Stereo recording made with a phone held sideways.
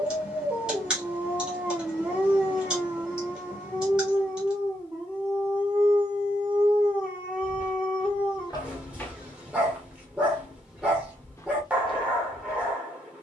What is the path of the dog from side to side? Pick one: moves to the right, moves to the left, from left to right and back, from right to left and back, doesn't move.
doesn't move.